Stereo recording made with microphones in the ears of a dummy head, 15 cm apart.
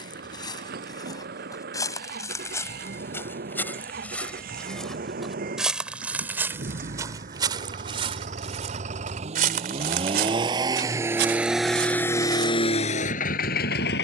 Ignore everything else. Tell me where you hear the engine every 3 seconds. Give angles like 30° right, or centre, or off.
60° right, 60° right, 50° right, 20° right, 40° left.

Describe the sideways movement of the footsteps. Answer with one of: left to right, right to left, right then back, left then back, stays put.
left to right.